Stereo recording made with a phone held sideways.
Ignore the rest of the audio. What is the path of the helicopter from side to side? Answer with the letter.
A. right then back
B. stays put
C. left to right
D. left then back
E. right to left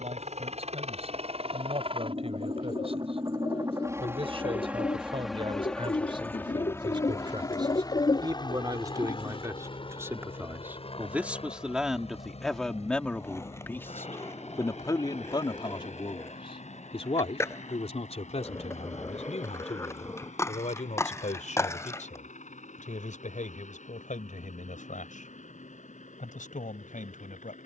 E.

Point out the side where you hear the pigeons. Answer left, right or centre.
left.